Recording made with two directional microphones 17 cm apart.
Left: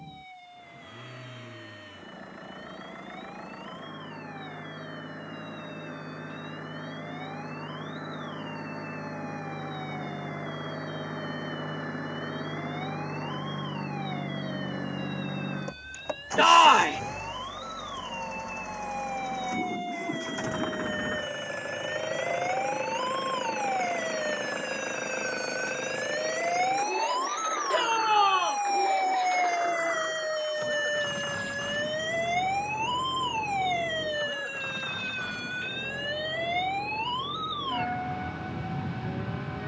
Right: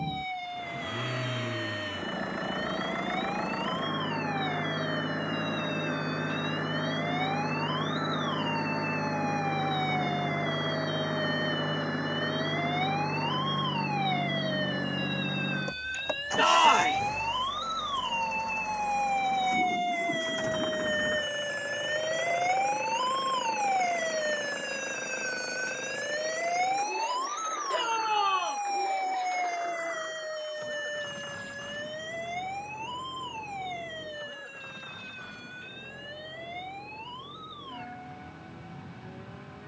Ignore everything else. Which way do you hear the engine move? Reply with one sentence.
You can hear the engine move from right to left.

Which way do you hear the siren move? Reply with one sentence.
You can hear the siren move to the left.